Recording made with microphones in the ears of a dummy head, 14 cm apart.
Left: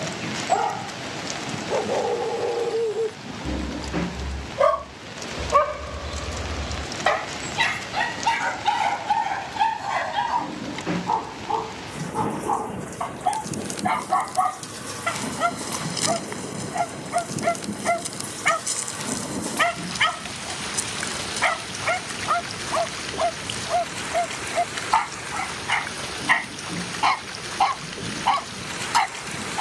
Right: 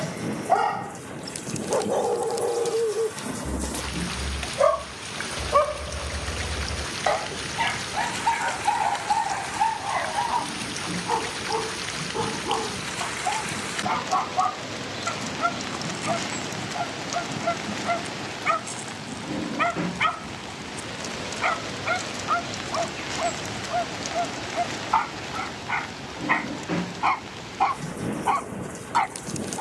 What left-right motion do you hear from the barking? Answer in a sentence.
You can hear the barking move to the left.